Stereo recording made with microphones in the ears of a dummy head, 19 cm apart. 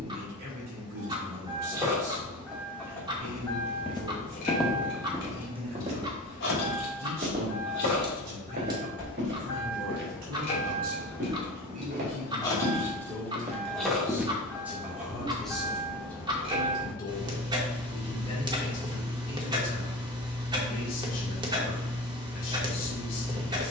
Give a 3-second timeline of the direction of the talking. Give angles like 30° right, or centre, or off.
40° right, 40° right, 40° right, 40° right, 20° right, 10° left, 40° left, 40° left.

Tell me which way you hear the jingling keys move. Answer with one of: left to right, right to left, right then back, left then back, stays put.
left then back.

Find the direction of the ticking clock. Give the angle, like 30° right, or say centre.
20° right.